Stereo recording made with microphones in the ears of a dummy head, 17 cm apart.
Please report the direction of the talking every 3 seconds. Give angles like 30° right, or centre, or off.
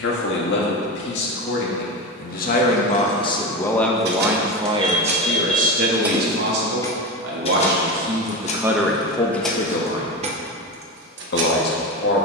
50° left, 10° right, 40° right, 50° left.